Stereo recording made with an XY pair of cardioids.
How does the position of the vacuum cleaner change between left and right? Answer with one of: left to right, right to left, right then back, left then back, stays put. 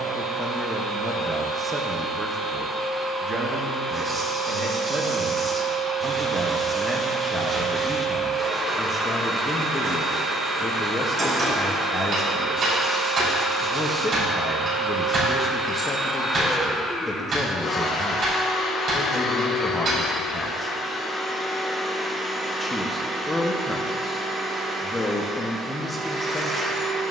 left then back.